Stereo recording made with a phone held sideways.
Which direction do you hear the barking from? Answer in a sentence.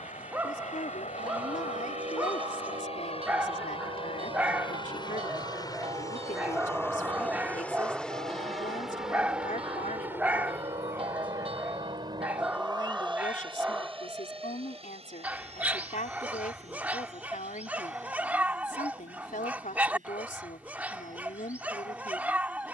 You can hear the barking in the centre.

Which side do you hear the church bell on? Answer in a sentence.
In this clip you hear the church bell on the right.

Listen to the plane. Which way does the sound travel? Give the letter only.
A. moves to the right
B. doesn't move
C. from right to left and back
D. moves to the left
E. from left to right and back
A.